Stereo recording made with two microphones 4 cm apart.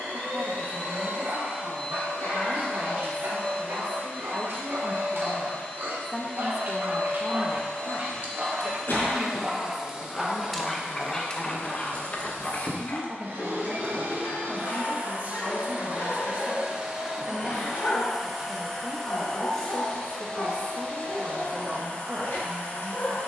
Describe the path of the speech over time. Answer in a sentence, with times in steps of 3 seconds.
In this clip you hear the speech on the right from 0 s, on the left from 6 s and on the right from 12 s.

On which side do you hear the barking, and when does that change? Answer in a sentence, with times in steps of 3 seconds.
In this clip you hear the barking on the right from 0 s, in the centre from 9 s and on the left from 12 s.